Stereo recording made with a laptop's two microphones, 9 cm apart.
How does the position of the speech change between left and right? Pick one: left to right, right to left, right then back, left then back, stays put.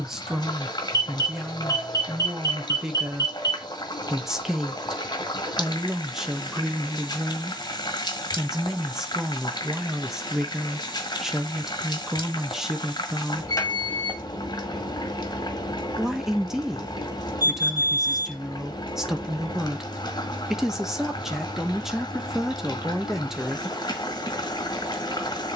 stays put.